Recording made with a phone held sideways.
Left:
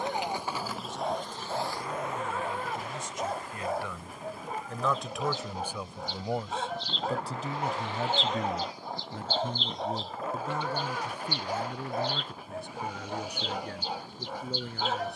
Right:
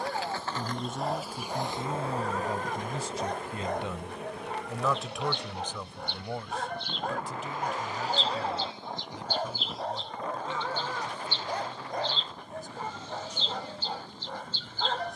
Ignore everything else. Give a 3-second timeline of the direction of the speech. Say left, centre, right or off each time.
right, centre, left, left, left.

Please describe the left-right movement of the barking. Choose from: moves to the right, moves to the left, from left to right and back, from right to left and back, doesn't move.
doesn't move.